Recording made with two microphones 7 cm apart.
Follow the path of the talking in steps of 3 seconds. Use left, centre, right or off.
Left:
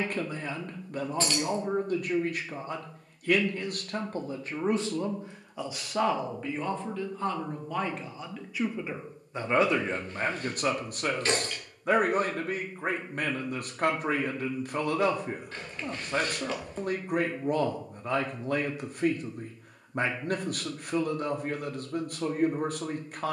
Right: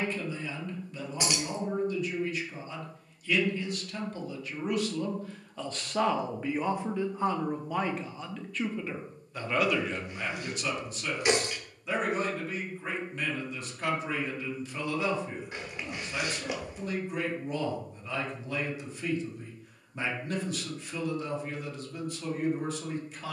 left, left, centre, left, left, left, left, left.